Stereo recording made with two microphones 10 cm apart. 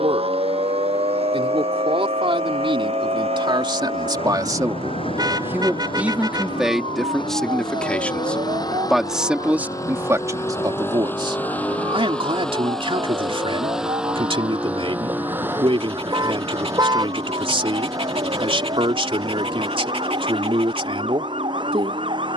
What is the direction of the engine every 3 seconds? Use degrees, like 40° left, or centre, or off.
70° left, 60° left, 50° left, 20° left, centre, 30° right, 40° right, 50° right.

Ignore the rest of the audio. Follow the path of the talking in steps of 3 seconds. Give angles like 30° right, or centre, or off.
60° right, 40° right, centre, 30° right, 60° right, 60° right, 60° right, 60° right.